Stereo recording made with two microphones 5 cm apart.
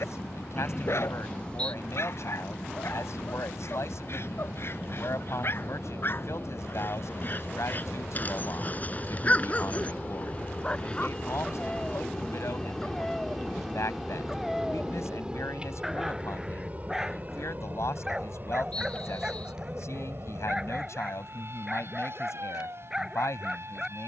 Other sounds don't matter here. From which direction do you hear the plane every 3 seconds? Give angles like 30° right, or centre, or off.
70° left, 70° left, 50° left, 30° left, centre, 30° right, 40° right, 50° right.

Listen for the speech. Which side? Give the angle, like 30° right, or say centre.
80° left.